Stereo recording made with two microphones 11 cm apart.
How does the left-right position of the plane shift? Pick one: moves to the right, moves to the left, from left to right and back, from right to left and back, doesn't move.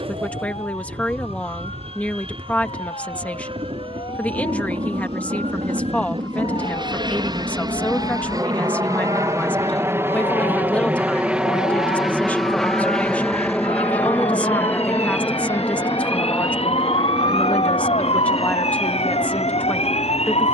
moves to the left.